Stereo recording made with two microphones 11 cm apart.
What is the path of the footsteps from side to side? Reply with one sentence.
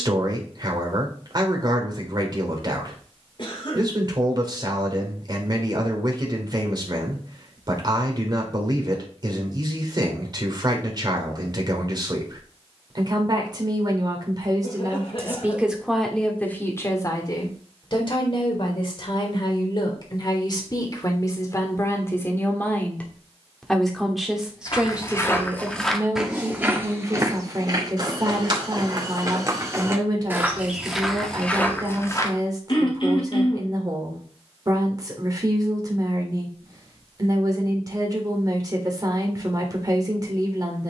You can hear the footsteps go right and come back.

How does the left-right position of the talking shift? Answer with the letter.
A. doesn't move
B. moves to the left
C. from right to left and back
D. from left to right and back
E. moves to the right
C.